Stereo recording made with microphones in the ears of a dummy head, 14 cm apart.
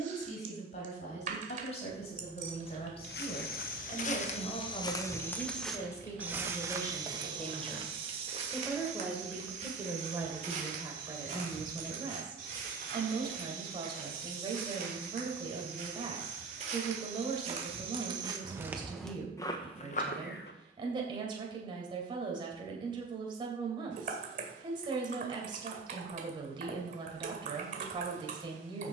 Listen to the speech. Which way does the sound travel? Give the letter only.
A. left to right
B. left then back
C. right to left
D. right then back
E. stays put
A.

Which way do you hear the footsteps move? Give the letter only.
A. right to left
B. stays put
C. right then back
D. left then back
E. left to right
C.